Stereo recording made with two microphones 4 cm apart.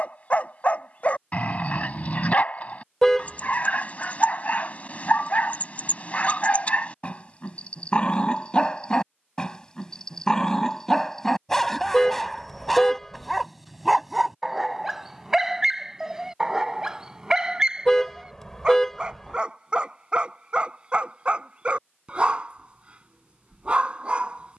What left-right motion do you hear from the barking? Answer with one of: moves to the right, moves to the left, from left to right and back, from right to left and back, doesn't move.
moves to the right.